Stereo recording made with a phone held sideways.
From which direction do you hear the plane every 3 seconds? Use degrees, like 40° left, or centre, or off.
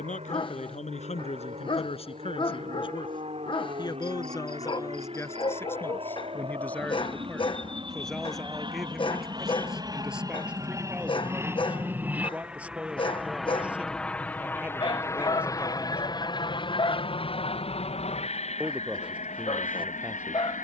60° right, 50° right, 40° right, 30° right, centre, 30° left, 50° left.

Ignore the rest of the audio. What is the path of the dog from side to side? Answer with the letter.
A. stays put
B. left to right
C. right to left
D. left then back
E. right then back
A.